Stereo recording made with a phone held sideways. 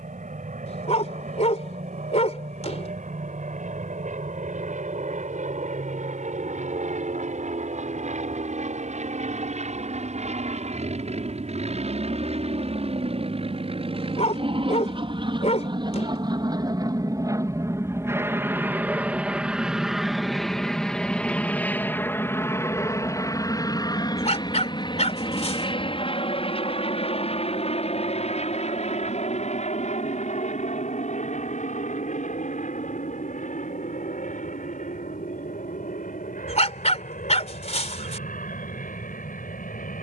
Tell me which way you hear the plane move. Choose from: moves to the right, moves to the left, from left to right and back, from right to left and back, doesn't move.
moves to the left.